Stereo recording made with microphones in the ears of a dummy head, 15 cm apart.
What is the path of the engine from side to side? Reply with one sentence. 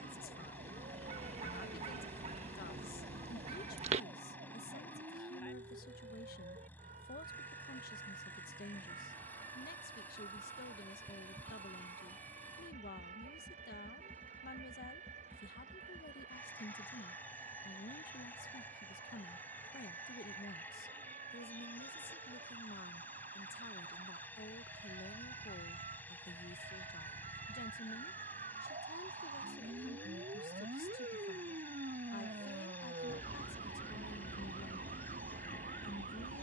In this clip you hear the engine stay in one place.